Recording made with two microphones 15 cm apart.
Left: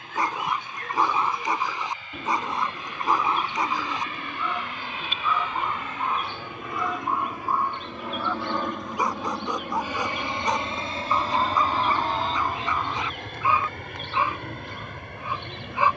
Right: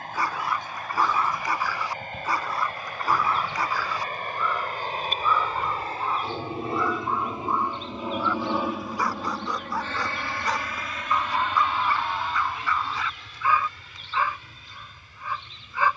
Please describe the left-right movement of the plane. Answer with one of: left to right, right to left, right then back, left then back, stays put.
right to left.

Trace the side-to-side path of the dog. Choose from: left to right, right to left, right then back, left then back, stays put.
stays put.